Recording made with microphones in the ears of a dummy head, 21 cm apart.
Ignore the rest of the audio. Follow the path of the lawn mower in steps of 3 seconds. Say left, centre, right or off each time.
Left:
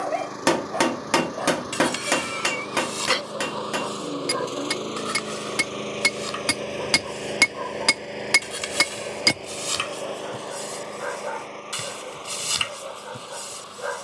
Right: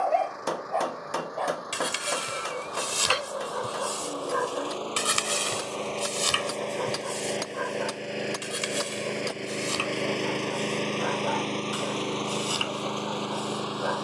left, left, centre, right, right.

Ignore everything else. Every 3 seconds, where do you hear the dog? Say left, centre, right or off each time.
centre, right, right, left, left.